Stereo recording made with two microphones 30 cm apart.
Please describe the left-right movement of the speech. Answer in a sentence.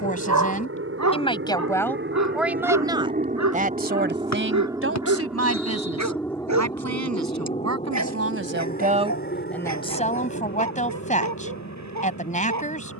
You can hear the speech move from left to right and back again.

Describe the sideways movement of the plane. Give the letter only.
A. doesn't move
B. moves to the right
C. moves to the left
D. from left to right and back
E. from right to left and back
C.